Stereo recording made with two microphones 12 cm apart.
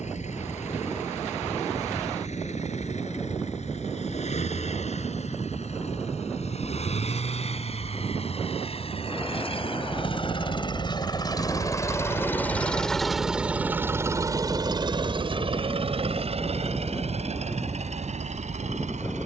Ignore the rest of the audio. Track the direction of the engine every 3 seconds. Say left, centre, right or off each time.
left, left, left, left, centre, right, right.